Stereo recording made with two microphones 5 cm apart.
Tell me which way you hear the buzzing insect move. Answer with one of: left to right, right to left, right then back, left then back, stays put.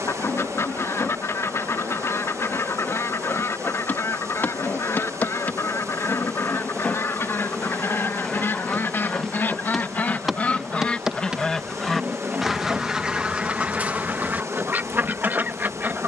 left to right.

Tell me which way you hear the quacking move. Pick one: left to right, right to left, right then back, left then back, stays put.
left to right.